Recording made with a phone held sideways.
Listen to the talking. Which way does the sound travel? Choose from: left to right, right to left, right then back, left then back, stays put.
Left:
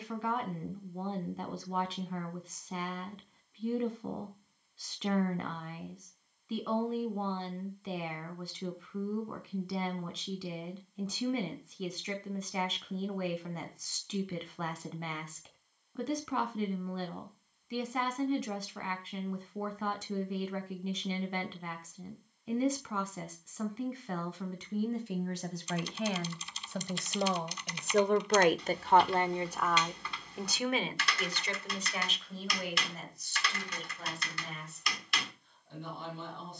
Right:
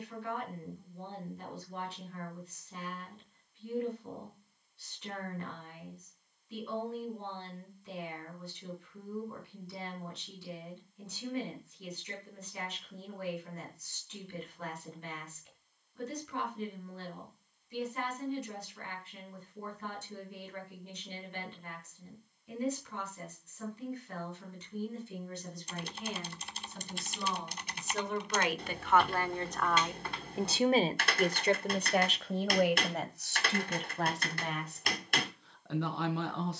left to right.